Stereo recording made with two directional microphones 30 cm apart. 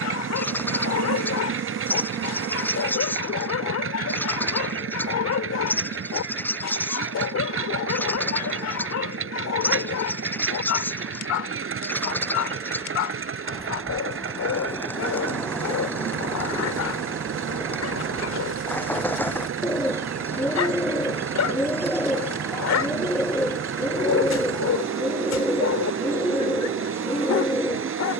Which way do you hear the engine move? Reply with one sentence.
You can hear the engine stay put.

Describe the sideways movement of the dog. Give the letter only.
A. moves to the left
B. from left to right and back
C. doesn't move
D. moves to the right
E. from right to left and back
C.